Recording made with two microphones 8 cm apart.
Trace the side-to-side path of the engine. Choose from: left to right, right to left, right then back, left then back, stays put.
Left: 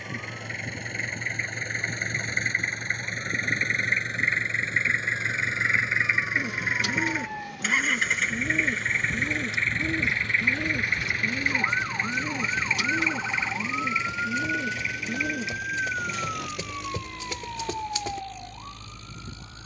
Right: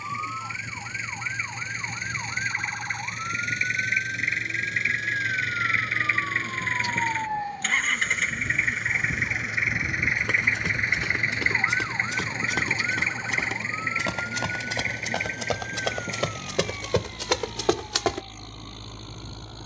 left to right.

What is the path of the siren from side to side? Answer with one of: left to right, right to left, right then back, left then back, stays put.
right to left.